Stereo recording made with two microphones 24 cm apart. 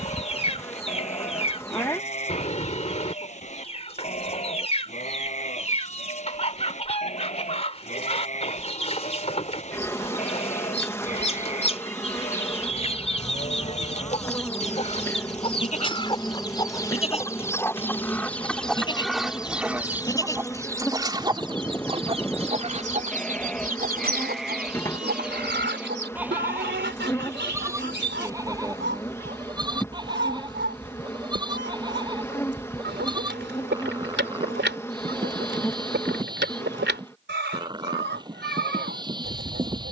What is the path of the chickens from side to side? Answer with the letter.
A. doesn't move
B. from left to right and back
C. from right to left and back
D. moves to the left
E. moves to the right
E.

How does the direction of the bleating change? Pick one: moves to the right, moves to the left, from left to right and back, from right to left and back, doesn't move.
moves to the right.